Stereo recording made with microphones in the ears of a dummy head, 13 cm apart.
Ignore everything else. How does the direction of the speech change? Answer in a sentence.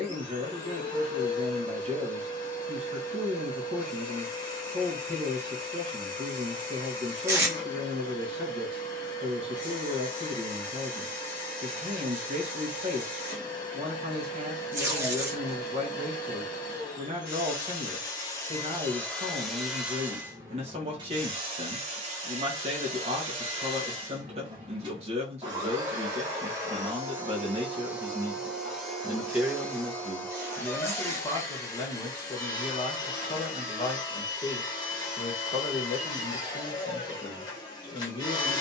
You can hear the speech move to the left.